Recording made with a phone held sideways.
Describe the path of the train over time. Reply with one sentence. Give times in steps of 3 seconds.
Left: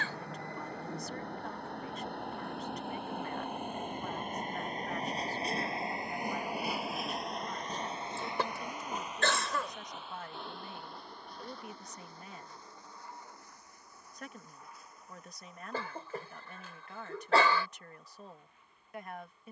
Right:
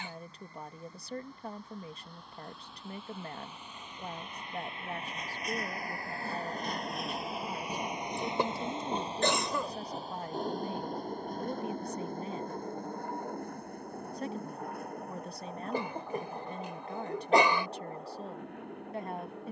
You can hear the train on the left from 0 s, in the centre from 6 s and on the right from 9 s.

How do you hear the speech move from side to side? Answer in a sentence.
You can hear the speech stay in one place.